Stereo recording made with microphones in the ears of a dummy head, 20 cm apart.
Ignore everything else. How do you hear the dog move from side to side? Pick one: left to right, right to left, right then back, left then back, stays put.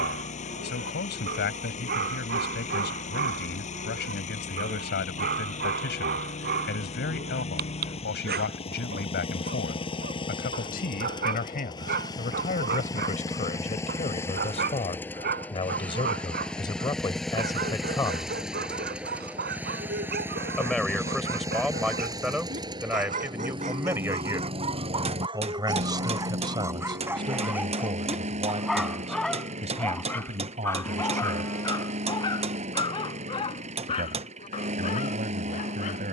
right to left.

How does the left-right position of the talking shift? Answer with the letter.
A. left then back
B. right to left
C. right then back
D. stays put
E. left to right
E.